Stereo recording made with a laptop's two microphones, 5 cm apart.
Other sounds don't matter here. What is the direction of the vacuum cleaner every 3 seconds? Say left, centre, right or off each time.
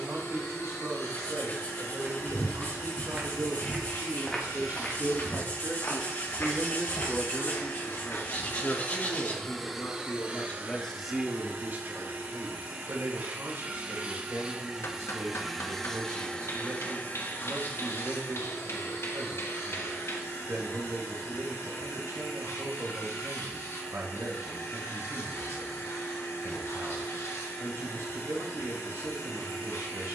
left, left, left, right, right, left, left, left, left, left.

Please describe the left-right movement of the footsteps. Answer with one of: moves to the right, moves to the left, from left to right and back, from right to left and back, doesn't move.
moves to the left.